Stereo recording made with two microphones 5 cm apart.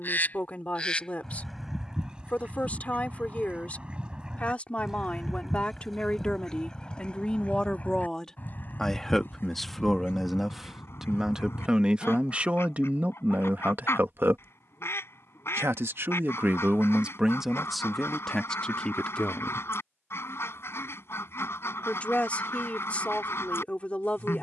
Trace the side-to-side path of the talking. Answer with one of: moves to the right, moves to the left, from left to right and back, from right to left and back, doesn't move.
from left to right and back.